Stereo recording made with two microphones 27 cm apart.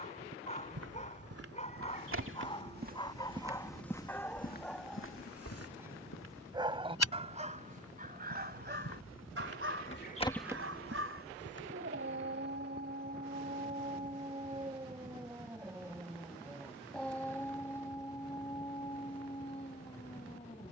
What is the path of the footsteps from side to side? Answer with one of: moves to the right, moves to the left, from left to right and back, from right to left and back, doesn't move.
from right to left and back.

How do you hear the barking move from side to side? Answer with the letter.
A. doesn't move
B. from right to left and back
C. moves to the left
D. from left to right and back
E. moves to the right
D.